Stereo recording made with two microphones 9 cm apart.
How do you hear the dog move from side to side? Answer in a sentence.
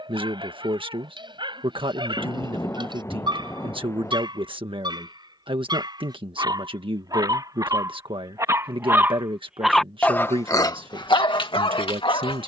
In this clip you hear the dog move from right to left.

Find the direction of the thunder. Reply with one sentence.
You can hear the thunder on the left.